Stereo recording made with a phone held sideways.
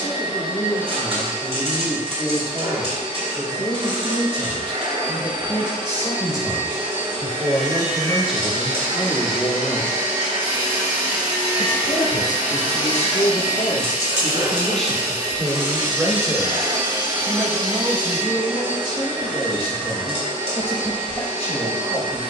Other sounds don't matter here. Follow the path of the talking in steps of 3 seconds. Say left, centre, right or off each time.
right, right, centre, left, left, right, right, right.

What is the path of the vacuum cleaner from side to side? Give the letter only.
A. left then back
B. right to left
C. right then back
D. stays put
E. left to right
D.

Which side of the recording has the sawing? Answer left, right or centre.
right.